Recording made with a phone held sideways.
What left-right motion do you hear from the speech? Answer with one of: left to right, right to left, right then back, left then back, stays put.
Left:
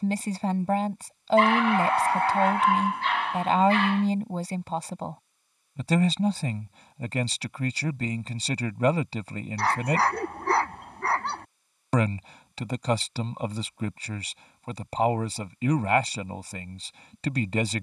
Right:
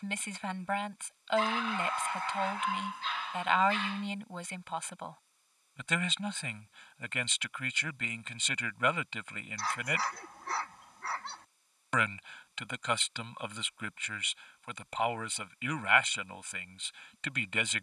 stays put.